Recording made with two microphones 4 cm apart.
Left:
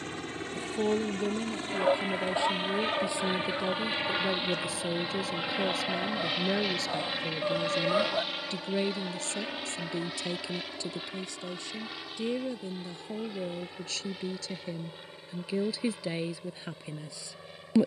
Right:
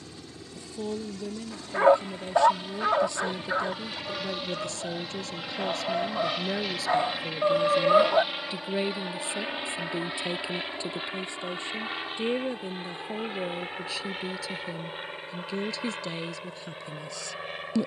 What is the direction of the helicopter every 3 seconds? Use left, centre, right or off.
left, left, centre, right, right, right.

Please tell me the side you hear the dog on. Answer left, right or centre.
right.